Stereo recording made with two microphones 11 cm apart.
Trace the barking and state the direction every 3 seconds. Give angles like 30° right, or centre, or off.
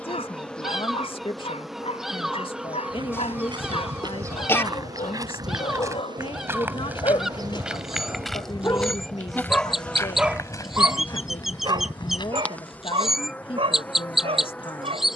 80° left, 70° left, 50° left, 20° right, 60° right.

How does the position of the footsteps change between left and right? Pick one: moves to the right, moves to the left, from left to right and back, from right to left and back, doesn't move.
moves to the left.